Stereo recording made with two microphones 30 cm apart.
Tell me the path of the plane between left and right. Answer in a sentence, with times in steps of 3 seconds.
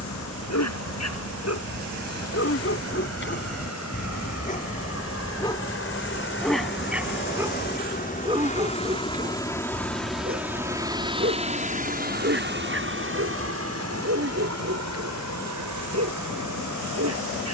In this clip you hear the plane on the left from 0 s, in the centre from 9 s and on the right from 12 s.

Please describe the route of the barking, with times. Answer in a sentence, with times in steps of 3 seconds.
You can hear the barking on the left from 0 s, in the centre from 6 s and on the right from 9 s.